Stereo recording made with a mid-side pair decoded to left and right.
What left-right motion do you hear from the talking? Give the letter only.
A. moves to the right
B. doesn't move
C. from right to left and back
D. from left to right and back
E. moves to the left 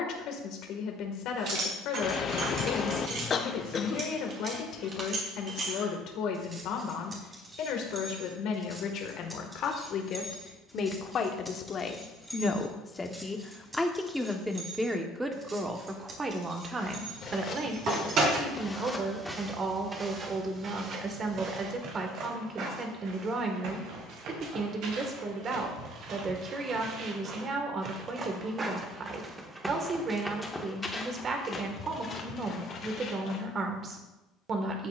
A.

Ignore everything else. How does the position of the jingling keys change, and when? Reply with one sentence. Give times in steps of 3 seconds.
You can hear the jingling keys on the right from 0 s, in the centre from 9 s, on the right from 15 s and not at all from 21 s.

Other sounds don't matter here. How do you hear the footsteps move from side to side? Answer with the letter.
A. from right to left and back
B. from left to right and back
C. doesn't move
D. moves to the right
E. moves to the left
B.